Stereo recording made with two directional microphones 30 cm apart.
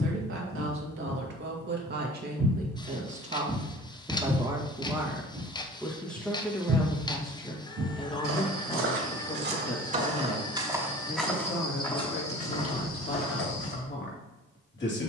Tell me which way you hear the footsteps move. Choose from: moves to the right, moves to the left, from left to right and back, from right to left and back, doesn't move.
from left to right and back.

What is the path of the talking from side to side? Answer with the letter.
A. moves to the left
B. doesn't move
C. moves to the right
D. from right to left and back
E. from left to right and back
A.